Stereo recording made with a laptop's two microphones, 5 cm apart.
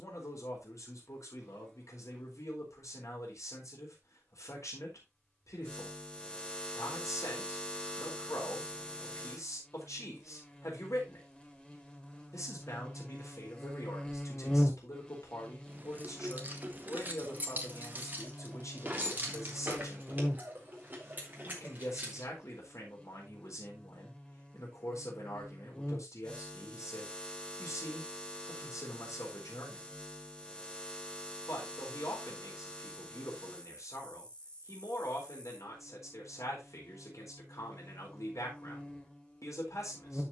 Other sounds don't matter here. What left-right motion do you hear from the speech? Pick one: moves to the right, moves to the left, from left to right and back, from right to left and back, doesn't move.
doesn't move.